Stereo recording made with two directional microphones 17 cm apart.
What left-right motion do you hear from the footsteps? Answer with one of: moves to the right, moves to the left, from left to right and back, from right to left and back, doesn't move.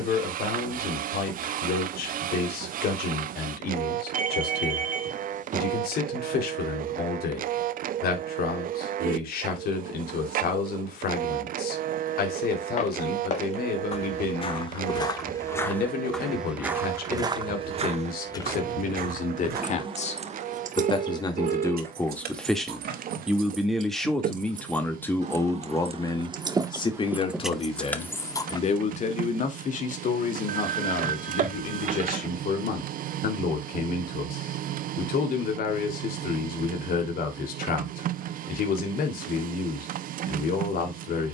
moves to the right.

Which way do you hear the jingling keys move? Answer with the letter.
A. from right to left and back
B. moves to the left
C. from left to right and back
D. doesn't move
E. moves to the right
C.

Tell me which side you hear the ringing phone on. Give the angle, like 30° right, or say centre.
50° right.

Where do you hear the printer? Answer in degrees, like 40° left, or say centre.
50° right.